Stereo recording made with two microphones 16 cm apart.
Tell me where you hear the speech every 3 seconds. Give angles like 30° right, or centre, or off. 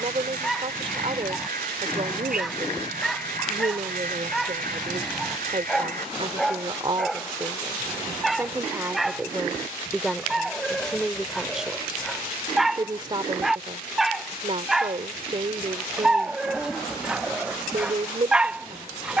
40° right, 40° right, 20° right, centre, 30° right, 40° right, 40° right.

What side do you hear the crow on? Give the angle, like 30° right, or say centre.
60° right.